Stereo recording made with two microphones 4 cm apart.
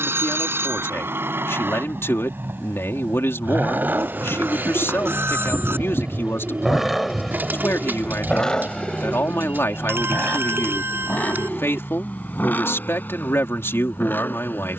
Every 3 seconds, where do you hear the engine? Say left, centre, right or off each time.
right, right, centre, left, left.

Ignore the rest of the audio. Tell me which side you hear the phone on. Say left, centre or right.
right.